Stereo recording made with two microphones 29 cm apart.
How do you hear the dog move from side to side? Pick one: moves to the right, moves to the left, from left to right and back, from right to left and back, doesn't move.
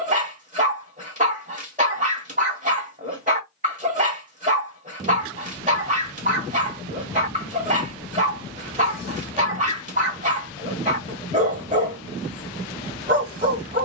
doesn't move.